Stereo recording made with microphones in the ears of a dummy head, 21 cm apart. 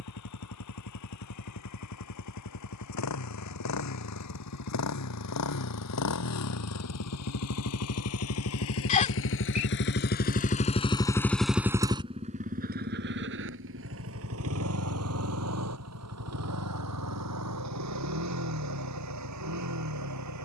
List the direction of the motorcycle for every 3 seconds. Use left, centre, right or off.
left, left, left, left, right, right, right.